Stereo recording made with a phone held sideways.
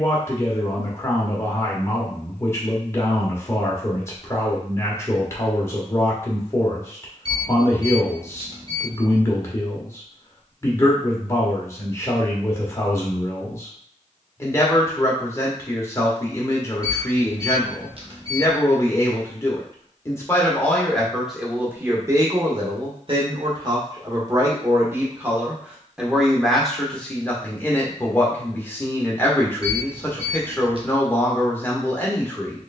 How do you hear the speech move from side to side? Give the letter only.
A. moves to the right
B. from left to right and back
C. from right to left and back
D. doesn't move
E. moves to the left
B.